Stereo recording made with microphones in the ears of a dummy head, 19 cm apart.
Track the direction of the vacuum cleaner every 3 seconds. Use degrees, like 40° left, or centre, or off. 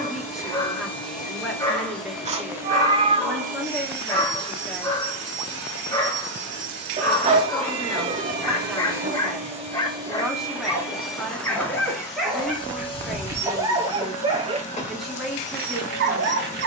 10° left, 50° right, 60° right, 10° right, 20° left, 30° left.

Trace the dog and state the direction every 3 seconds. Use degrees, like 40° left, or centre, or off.
20° left, 20° left, 20° left, 10° left, 10° right, 50° right.